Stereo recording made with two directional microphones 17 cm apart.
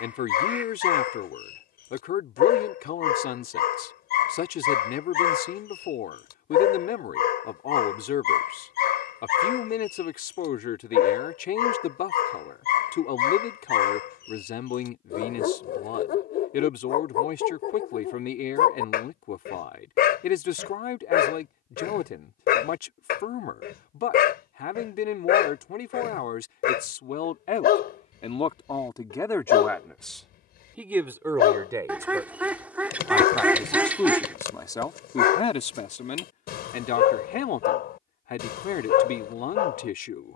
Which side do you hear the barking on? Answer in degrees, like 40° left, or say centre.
70° left.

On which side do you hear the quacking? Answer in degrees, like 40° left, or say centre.
10° right.